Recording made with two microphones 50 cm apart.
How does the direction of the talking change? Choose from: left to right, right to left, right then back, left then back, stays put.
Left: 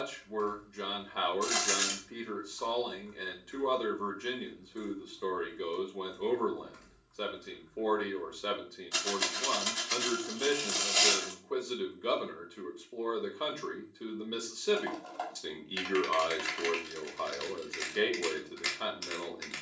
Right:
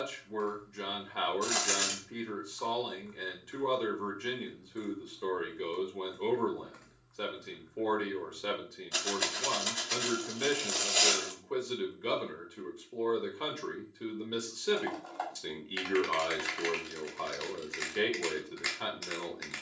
stays put.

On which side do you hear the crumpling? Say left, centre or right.
left.